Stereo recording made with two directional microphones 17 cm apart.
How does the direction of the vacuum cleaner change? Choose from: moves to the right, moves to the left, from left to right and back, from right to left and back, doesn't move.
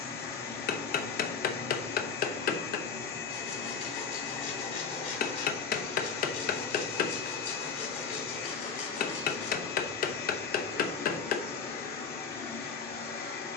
doesn't move.